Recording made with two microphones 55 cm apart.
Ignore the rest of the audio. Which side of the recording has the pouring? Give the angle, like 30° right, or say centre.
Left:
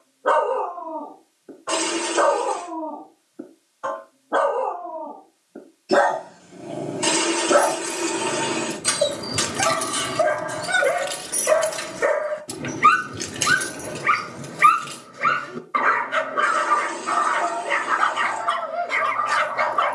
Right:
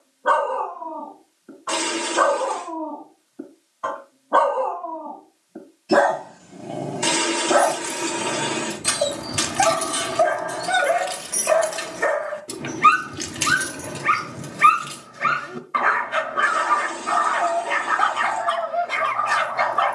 40° right.